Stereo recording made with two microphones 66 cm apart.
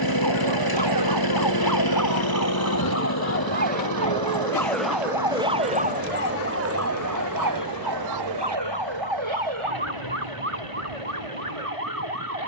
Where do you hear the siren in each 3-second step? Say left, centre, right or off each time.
left, centre, right, right.